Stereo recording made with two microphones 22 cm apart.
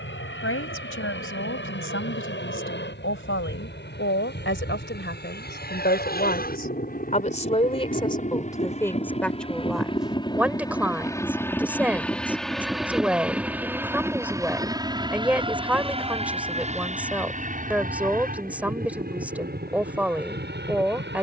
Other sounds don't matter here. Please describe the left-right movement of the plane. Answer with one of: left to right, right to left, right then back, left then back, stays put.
left to right.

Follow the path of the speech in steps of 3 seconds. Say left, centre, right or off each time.
left, left, left, centre, centre, centre, centre.